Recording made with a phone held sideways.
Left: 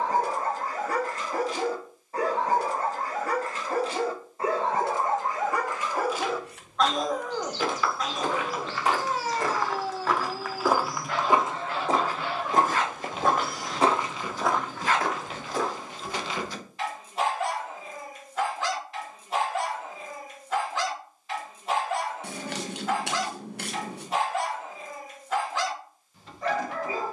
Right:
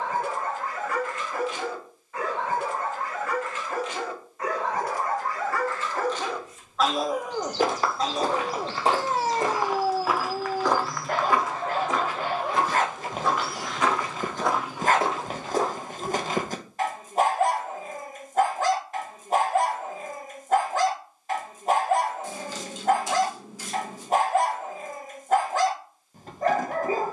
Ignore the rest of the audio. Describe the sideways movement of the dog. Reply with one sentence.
In this clip you hear the dog travel towards the right.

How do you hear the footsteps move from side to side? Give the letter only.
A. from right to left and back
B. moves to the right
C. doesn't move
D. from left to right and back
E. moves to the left
A.